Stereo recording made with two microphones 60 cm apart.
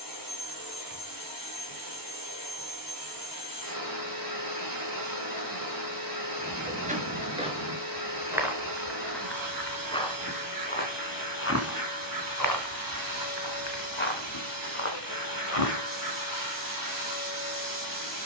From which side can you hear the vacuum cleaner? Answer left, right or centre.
right.